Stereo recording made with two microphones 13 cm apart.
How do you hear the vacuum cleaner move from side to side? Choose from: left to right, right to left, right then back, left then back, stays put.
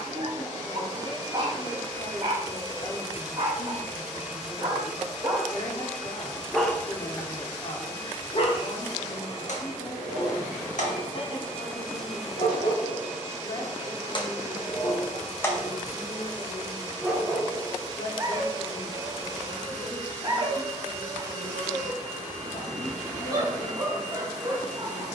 left then back.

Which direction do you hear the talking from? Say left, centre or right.
left.